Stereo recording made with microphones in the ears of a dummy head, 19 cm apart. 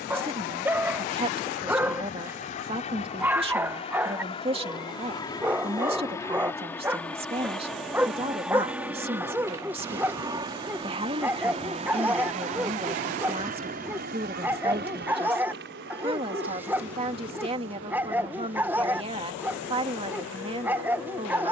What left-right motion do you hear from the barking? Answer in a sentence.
You can hear the barking stay in one place.